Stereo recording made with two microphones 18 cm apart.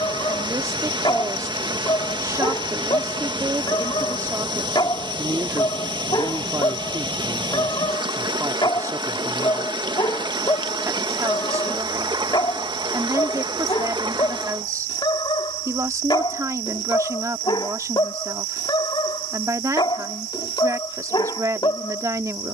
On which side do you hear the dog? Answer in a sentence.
You can hear the dog on the left.